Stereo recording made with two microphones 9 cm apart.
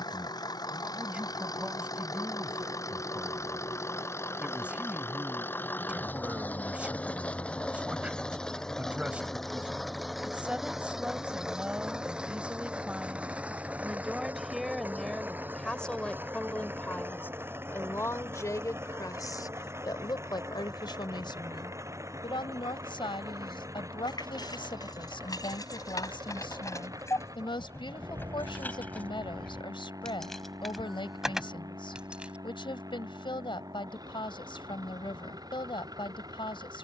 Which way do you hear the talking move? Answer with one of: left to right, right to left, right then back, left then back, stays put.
right to left.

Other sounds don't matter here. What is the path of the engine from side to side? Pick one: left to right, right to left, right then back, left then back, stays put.
left to right.